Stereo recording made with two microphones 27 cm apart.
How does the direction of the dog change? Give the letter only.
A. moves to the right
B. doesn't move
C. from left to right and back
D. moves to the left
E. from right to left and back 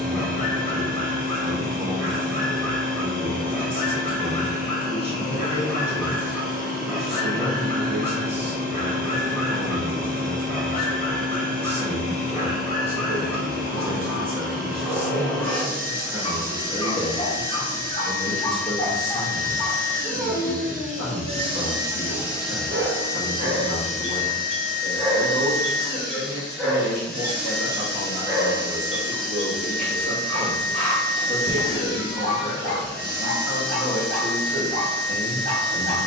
C.